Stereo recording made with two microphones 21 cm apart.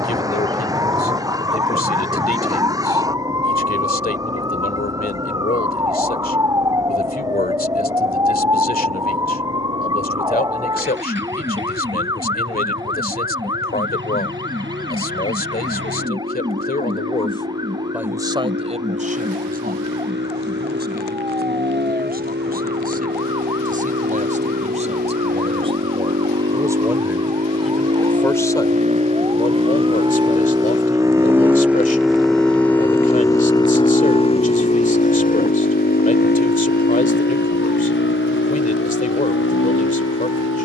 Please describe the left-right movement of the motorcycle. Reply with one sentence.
You can hear the motorcycle move to the left.